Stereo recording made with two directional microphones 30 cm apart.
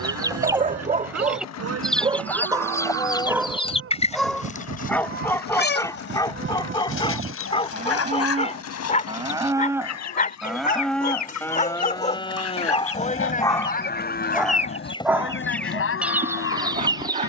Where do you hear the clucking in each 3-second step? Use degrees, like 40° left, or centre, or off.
centre, 20° left, 50° left, 60° left, 40° left, centre.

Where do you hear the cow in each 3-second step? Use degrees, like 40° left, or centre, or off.
50° right, 40° right, 30° right, centre, 30° left, 50° left.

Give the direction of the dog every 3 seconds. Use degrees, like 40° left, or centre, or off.
20° right, centre, 20° left, 30° left, 10° left, 20° right.